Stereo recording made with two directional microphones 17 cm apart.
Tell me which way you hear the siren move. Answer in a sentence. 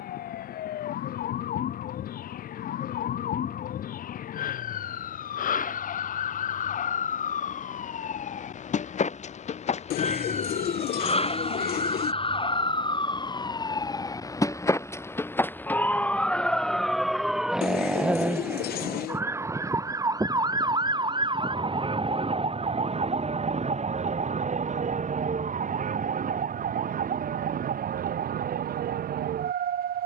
You can hear the siren move from left to right.